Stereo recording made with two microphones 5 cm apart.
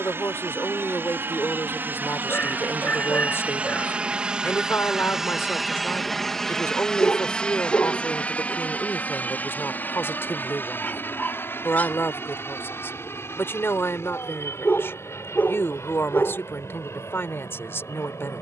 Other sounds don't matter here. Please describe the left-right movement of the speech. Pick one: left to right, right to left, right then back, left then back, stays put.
stays put.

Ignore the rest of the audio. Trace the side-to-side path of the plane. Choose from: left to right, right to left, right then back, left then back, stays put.
right to left.